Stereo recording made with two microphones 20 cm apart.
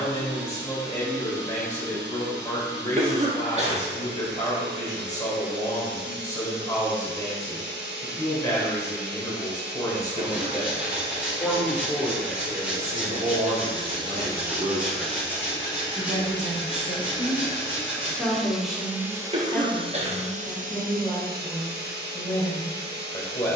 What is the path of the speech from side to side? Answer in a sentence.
You can hear the speech move from left to right and back again.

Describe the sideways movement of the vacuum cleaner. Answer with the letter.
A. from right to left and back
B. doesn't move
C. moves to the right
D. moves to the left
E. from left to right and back
A.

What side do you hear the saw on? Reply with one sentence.
In this clip you hear the saw in the centre.